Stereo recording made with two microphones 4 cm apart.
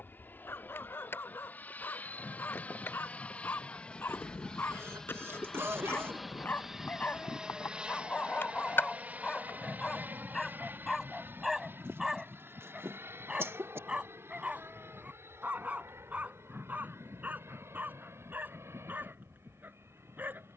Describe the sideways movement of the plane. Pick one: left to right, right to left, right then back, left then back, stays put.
left to right.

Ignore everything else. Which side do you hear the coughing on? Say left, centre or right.
right.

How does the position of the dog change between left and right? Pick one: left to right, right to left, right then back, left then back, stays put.
left to right.